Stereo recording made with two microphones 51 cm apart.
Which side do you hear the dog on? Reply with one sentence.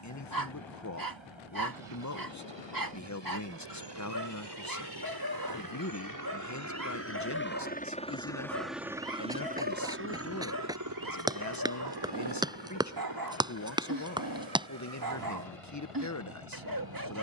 You can hear the dog on the right.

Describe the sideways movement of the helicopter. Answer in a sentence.
In this clip you hear the helicopter move to the right.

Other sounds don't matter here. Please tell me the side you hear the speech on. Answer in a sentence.
In this clip you hear the speech on the left.